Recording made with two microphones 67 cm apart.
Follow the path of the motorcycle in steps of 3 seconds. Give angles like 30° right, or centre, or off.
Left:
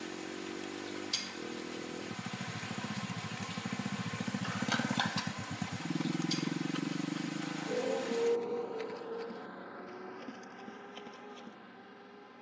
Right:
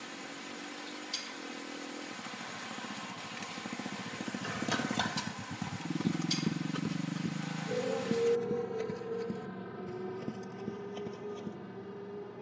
60° left, 30° left, 30° right, 60° right.